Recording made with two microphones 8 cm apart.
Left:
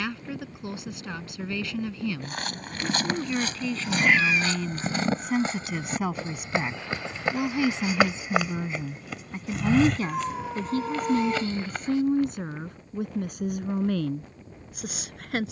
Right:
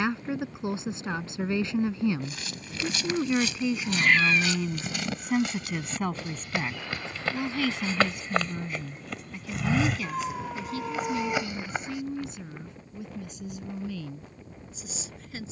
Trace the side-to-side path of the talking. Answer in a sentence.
You can hear the talking travel towards the left.